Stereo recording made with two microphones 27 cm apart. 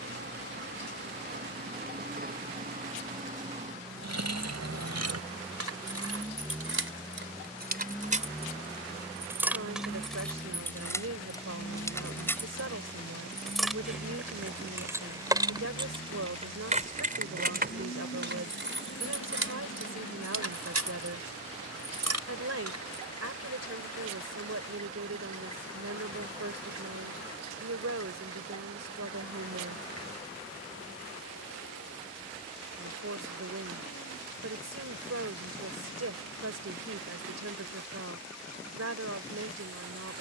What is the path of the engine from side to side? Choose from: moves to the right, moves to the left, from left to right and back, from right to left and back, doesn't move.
moves to the left.